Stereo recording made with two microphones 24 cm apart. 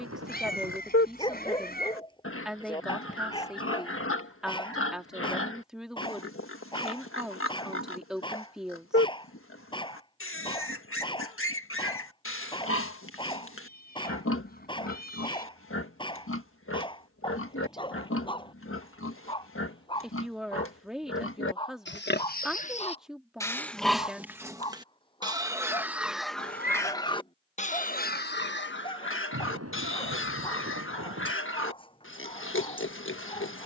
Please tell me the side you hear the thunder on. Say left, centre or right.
right.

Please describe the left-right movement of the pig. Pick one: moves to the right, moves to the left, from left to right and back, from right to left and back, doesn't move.
from left to right and back.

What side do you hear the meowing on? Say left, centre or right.
left.